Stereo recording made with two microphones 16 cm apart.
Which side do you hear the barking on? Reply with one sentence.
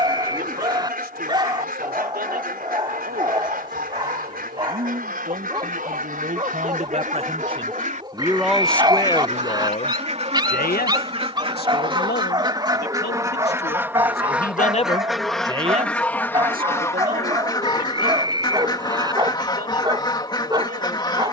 You can hear the barking on the right.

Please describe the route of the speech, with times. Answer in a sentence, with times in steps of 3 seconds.
You can hear the speech on the right from 0 s, on the left from 9 s and on the right from 15 s.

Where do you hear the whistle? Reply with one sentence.
You can hear the whistle on the right.